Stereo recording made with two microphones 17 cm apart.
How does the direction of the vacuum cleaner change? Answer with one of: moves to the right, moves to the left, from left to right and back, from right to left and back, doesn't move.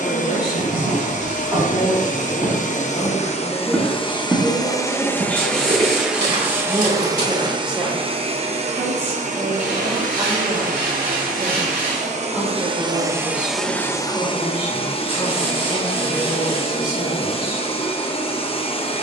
from left to right and back.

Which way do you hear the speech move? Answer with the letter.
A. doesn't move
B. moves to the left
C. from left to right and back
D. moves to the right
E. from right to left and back
C.